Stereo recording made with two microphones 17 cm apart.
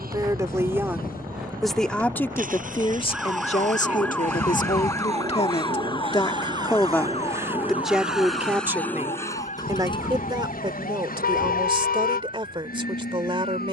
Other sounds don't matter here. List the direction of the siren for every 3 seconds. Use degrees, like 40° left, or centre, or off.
20° right, 10° left, 40° left, 50° left, 50° left.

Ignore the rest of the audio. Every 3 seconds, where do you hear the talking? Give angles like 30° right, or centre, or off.
centre, 40° left, centre, 30° right, 30° right.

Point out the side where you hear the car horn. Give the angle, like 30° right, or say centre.
60° left.